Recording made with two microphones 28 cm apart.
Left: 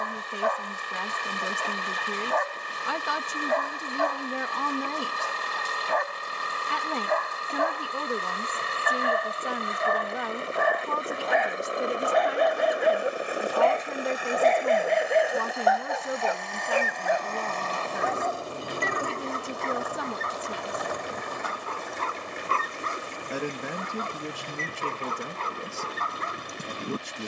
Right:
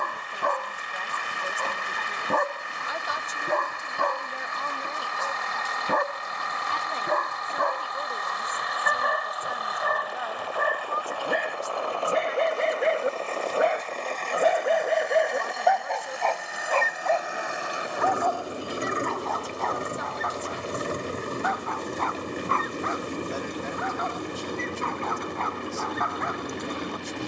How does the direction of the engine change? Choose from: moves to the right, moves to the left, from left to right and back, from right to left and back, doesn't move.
moves to the right.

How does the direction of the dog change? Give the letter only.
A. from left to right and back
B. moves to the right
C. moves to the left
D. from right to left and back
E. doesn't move
C.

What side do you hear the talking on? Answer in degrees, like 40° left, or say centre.
80° left.